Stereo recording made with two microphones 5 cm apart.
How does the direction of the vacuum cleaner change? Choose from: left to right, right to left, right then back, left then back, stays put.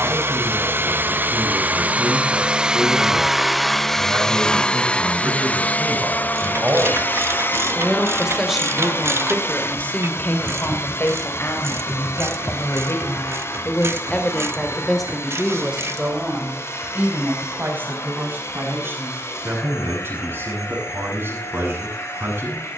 right to left.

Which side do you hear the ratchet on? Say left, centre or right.
right.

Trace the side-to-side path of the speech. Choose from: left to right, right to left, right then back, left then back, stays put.
left then back.